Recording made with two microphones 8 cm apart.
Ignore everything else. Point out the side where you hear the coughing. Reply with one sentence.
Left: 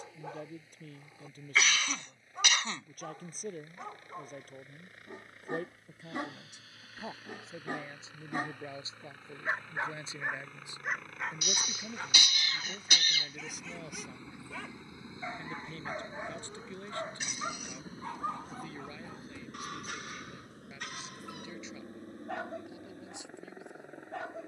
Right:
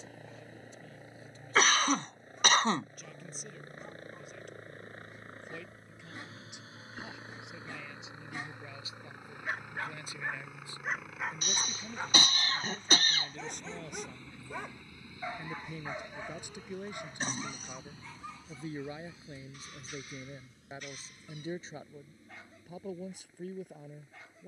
In this clip you hear the coughing on the right.